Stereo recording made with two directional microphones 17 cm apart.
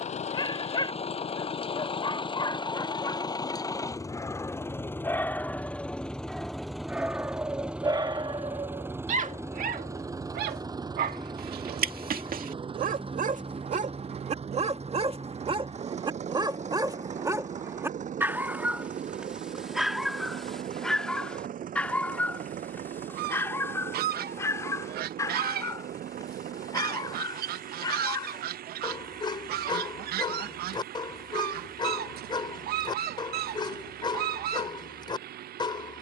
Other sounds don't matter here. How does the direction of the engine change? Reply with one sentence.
You can hear the engine move to the right.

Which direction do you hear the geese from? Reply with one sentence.
In this clip you hear the geese on the right.